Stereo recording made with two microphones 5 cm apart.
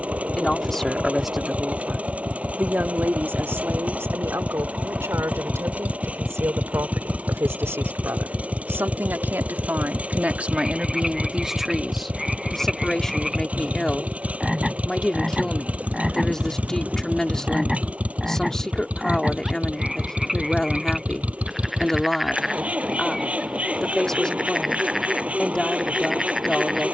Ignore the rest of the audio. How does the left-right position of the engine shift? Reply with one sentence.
You can hear the engine stay put.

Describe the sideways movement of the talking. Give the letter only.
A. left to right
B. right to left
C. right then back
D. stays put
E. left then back
C.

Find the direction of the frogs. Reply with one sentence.
You can hear the frogs in the centre.